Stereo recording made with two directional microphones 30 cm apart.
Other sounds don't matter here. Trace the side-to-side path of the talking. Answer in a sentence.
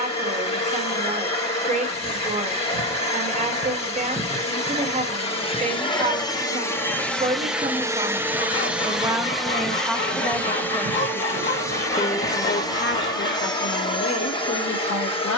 You can hear the talking move from right to left.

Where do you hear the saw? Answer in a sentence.
In this clip you hear the saw on the left.